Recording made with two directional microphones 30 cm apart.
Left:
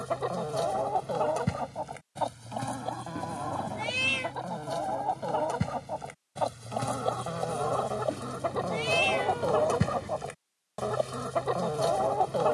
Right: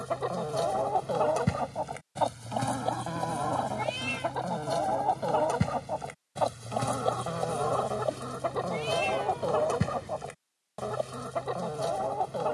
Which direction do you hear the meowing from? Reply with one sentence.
In this clip you hear the meowing on the left.